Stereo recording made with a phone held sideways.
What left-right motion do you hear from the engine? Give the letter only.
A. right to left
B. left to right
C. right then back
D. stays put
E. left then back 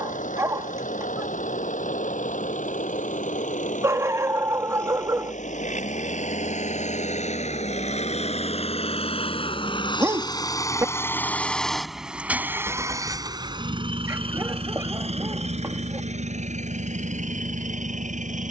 B.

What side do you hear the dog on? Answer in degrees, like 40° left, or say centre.
20° right.